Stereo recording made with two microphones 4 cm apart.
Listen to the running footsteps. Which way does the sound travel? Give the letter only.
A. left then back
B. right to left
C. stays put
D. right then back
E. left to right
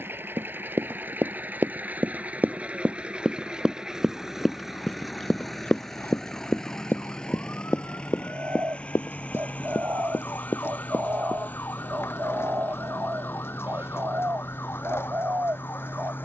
B.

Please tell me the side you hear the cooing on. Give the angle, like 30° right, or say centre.
70° right.